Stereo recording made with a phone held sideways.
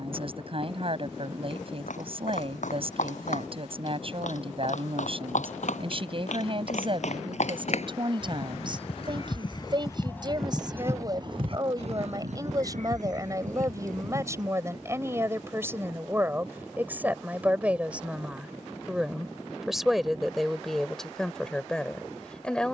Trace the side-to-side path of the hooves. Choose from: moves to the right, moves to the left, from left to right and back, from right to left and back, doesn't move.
moves to the right.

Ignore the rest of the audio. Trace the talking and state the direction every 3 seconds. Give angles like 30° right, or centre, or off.
40° right, 40° right, 40° right, 30° right, 20° right, 10° right, centre, 10° left.